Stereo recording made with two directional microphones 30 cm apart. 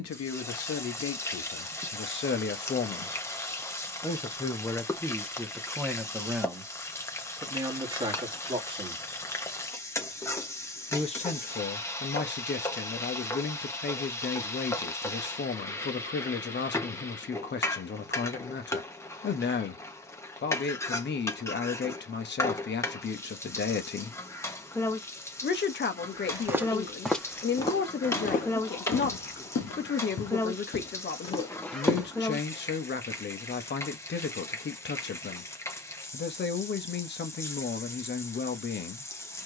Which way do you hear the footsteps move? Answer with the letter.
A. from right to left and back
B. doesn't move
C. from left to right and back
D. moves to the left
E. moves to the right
A.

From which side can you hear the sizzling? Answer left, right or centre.
centre.